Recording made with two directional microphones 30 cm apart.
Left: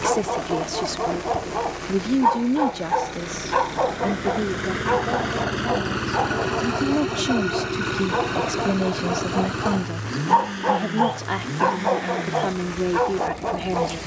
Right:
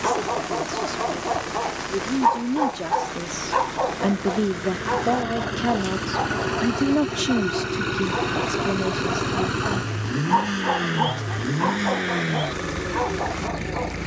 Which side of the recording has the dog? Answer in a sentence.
In this clip you hear the dog on the left.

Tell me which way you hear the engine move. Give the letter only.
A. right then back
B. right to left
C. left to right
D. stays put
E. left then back
C.